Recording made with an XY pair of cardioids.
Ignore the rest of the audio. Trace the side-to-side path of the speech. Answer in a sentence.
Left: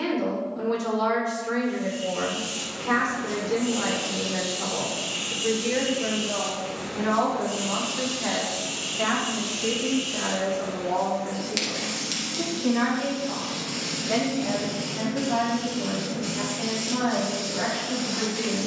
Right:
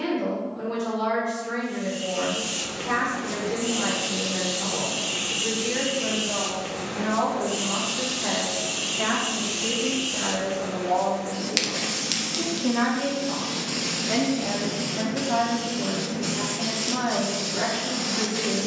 In this clip you hear the speech go from the left side to the right.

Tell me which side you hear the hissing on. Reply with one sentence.
You can hear the hissing on the right.